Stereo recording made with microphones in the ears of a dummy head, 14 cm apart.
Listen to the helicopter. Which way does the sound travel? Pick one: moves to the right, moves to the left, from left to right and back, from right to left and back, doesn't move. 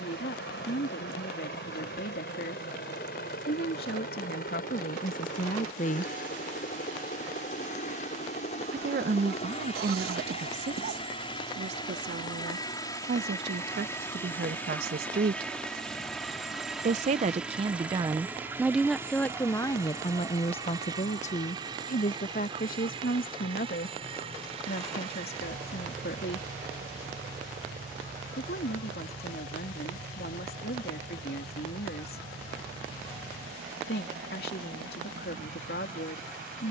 moves to the right.